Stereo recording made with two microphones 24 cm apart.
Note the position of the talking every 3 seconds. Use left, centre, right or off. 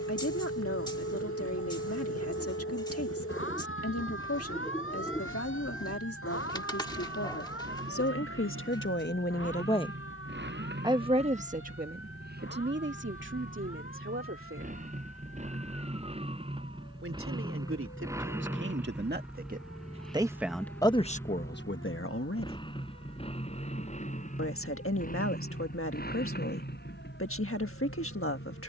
left, left, left, centre, right, right, right, left, left, left.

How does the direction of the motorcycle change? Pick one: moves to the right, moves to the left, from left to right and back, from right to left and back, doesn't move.
moves to the left.